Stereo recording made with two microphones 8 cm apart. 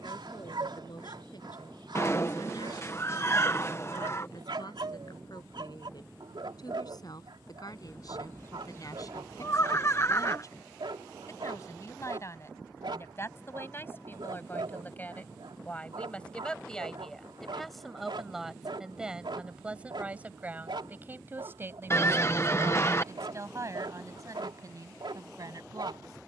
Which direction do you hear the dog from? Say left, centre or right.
right.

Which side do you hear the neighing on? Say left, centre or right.
left.